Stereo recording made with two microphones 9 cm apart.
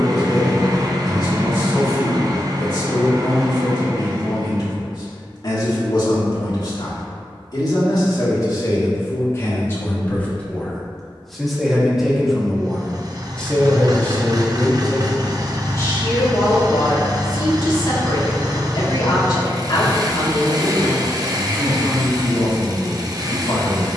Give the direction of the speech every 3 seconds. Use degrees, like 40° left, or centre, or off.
50° left, 50° left, 50° left, 20° left, 10° left, 40° left, 50° left, 50° left.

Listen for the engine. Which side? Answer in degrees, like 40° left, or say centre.
40° right.